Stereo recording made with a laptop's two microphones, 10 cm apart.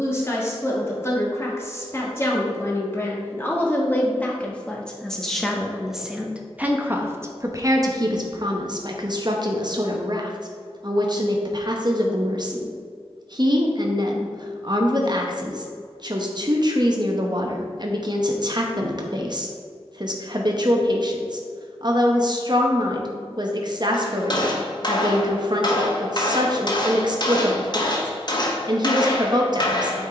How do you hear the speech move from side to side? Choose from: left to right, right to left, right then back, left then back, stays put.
left to right.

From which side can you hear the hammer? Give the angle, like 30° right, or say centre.
40° left.